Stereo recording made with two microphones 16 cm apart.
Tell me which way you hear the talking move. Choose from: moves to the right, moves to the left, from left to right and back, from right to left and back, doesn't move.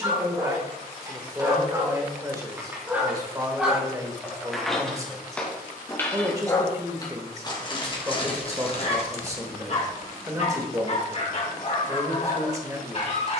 doesn't move.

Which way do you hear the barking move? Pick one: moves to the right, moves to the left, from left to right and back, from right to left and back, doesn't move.
moves to the left.